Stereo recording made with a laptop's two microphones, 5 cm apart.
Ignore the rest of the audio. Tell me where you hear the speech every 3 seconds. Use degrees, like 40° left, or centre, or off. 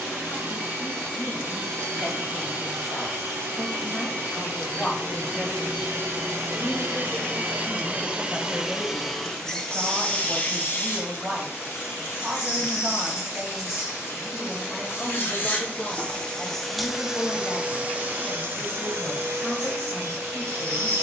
40° left, 30° left, centre, 20° right, 20° right, 30° left, 40° left.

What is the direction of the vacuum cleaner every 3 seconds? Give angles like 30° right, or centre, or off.
70° right, 70° right, 40° right, 30° left, 60° left, 10° left, 60° right.